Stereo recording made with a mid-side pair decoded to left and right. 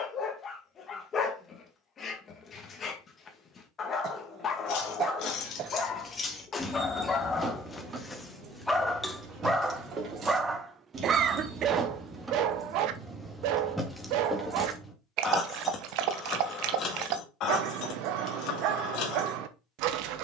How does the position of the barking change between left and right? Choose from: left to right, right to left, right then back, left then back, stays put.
left to right.